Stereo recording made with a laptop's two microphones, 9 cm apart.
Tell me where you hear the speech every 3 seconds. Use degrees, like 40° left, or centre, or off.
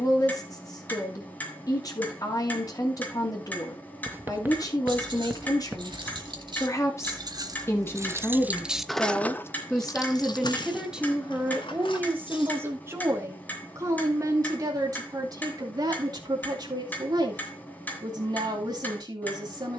40° left, 40° left, 30° left, centre, 30° right, 50° right, 50° right.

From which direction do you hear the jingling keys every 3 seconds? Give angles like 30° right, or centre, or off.
off, 70° right, 40° right, 50° left, 80° left, off, off.